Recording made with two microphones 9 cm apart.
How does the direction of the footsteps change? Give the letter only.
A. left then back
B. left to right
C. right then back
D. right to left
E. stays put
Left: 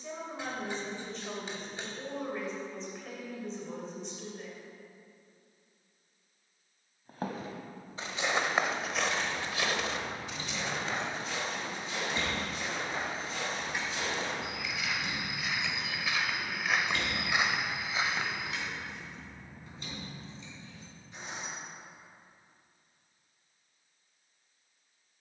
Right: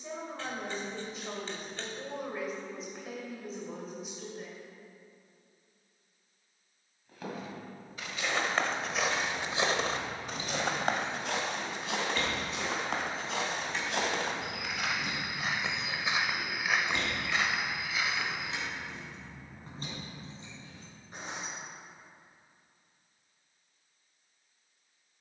C.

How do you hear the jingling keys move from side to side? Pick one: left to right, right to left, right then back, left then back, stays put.
left then back.